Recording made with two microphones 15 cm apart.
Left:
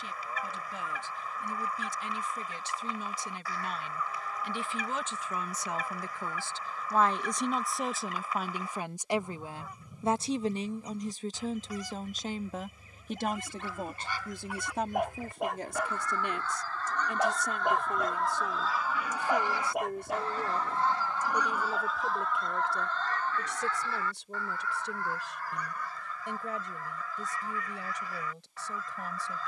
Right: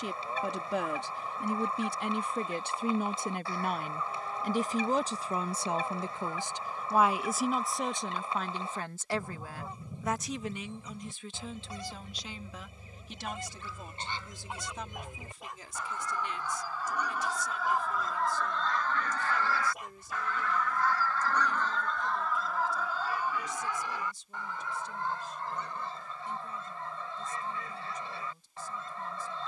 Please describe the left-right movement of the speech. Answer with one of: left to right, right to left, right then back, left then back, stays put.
right to left.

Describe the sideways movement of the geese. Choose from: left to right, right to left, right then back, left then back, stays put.
left then back.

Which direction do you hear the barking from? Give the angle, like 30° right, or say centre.
70° left.